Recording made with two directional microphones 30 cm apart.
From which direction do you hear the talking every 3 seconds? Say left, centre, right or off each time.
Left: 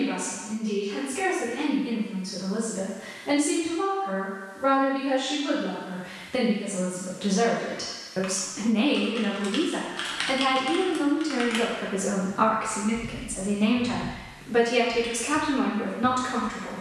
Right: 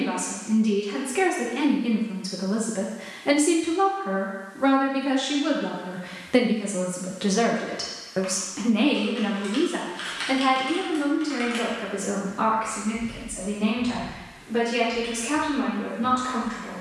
right, right, right, centre, left, left.